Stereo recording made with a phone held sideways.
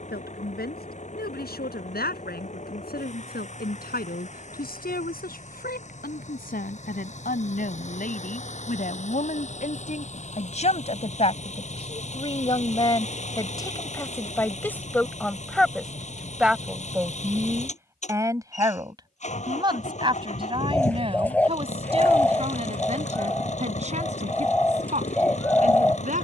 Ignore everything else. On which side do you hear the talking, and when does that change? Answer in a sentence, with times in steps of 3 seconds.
You can hear the talking on the left from 0 s, in the centre from 15 s and on the right from 18 s.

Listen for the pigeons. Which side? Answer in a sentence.
You can hear the pigeons in the centre.